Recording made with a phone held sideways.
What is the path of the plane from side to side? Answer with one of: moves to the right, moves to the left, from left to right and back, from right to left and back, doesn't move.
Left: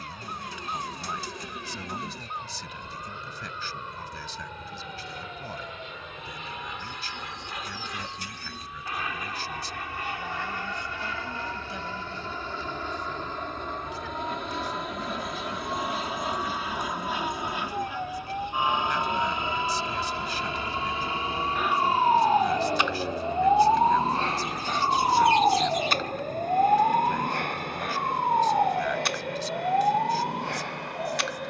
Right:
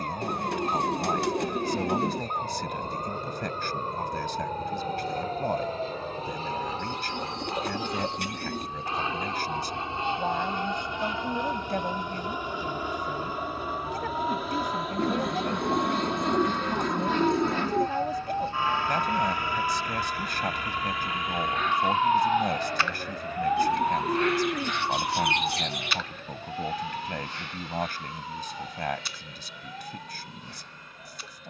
moves to the left.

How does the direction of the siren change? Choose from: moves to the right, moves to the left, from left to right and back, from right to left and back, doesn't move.
moves to the left.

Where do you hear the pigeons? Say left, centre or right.
right.